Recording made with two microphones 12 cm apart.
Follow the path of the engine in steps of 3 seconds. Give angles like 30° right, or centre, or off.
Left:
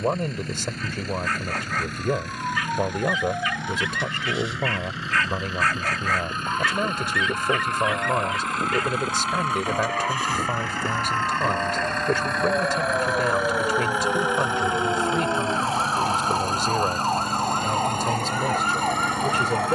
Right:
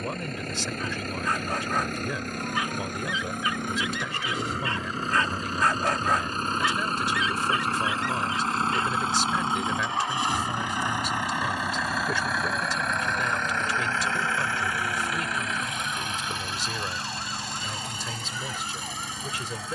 50° right, 40° right, 30° right, 20° right, 10° left, 40° left, 60° left.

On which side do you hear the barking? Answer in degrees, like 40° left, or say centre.
20° right.